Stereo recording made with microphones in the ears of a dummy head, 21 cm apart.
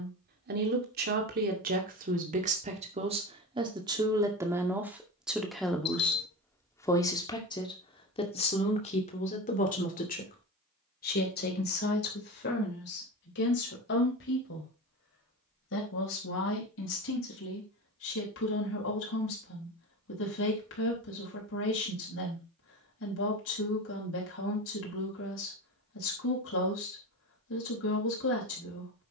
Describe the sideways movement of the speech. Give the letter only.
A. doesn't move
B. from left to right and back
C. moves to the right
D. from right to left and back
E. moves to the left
E.